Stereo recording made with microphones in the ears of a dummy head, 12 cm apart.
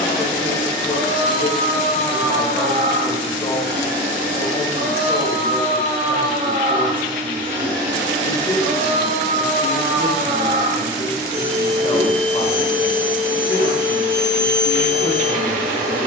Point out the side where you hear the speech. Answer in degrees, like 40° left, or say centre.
40° left.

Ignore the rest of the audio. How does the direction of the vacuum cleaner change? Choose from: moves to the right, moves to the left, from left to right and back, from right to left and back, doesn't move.
doesn't move.